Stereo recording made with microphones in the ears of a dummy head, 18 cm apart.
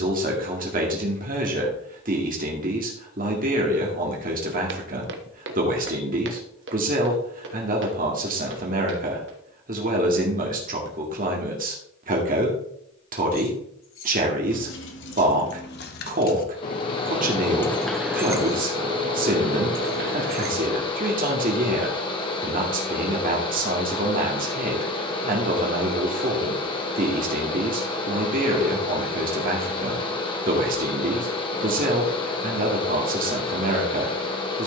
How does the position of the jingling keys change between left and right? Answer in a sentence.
You can hear the jingling keys move to the right.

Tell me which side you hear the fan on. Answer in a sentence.
You can hear the fan on the left.